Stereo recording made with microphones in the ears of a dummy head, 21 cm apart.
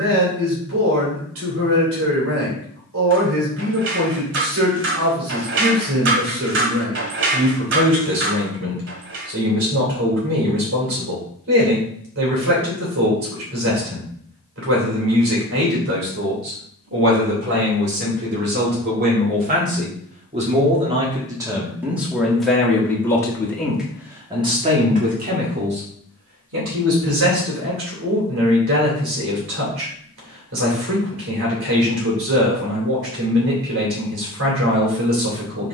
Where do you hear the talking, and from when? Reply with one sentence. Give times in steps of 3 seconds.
In this clip you hear the talking on the right from 0 s, in the centre from 21 s and on the right from 24 s.